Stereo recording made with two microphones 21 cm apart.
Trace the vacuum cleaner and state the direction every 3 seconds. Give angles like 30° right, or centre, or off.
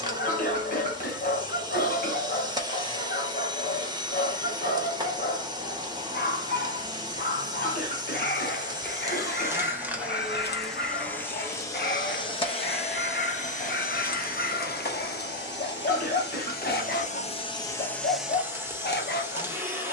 20° right, 20° right, 20° right, centre, 40° left, 40° left, 10° right.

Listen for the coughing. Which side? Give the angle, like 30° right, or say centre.
40° left.